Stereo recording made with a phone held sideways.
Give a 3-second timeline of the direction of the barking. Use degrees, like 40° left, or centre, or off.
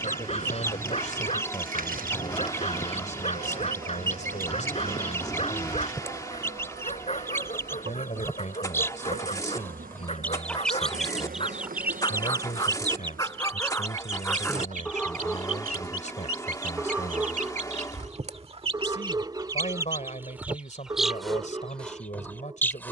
40° left, 40° left, 40° left, 40° left, 20° left, 10° right, 20° right, 20° right.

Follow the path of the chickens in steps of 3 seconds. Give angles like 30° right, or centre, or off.
20° left, 20° left, 20° left, centre, 40° right, 60° right, 20° right, 10° left.